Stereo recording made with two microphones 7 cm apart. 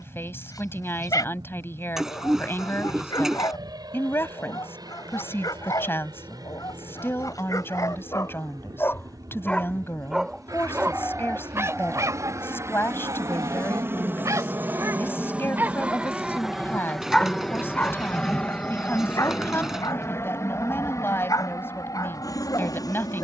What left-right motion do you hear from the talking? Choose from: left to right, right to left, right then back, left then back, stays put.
stays put.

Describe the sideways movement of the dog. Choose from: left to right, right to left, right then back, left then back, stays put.
right then back.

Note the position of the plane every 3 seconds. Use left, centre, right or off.
right, right, right, right, right, centre, left, left.